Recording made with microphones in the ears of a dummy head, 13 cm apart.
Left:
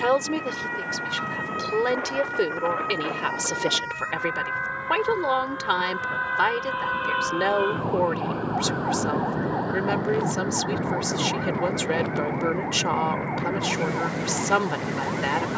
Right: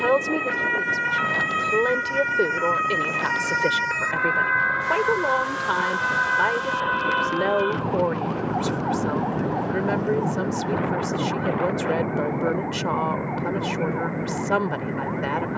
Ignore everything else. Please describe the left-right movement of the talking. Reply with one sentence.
In this clip you hear the talking stay in one place.